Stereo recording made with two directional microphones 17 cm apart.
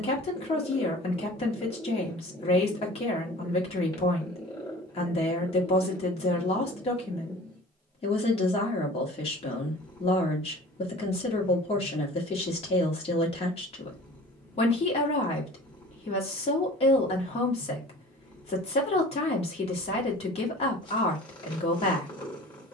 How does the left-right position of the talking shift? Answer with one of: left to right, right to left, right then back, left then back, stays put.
stays put.